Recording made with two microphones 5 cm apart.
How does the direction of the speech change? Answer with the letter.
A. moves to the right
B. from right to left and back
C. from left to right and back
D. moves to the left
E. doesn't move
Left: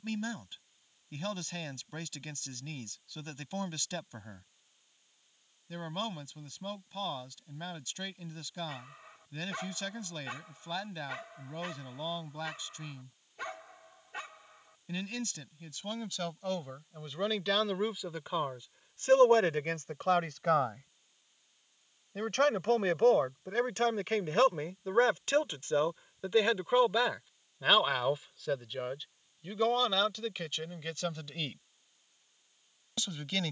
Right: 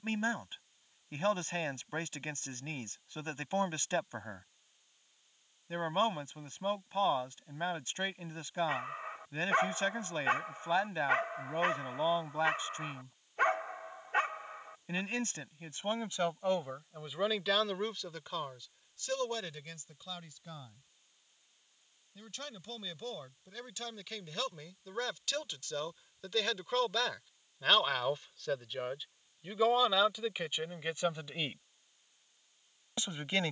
B.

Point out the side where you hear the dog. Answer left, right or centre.
right.